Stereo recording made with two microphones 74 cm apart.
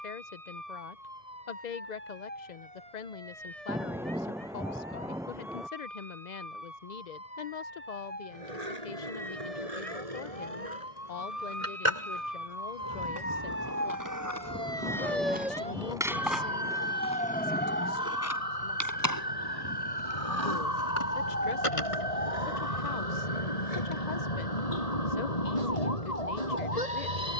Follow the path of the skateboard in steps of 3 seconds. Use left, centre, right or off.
off, off, right, right, right, centre, left, left, off.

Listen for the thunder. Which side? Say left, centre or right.
centre.